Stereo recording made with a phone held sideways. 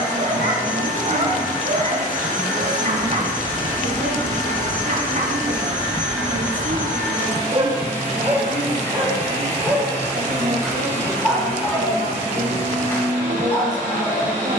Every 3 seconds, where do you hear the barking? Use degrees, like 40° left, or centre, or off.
50° right, 50° right, 30° right, centre, 20° left.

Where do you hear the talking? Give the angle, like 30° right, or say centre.
60° right.